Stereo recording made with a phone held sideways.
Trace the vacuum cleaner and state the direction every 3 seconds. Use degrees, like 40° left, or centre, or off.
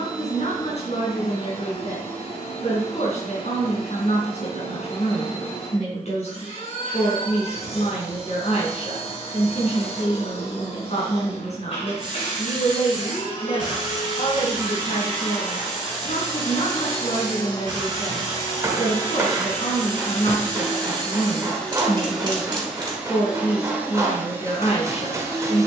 50° left, 50° left, 50° left, 50° left, 40° left, 30° left, 20° left, centre, 20° right.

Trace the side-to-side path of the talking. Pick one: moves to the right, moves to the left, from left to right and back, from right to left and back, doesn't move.
doesn't move.